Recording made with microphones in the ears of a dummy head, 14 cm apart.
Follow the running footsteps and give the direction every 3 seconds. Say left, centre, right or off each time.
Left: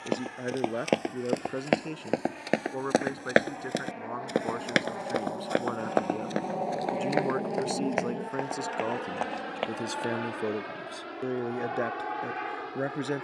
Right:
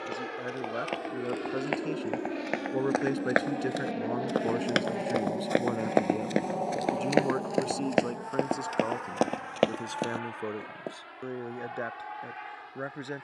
left, centre, right, right, off.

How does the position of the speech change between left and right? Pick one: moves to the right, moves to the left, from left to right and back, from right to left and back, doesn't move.
from left to right and back.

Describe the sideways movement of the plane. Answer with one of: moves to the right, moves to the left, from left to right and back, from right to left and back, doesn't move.
moves to the left.